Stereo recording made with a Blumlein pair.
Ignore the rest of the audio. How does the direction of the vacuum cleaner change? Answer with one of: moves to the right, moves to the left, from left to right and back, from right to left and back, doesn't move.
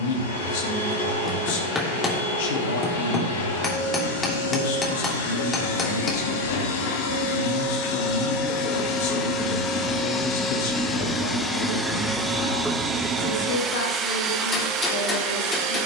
moves to the right.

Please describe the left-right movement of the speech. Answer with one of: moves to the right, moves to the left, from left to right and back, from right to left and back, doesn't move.
doesn't move.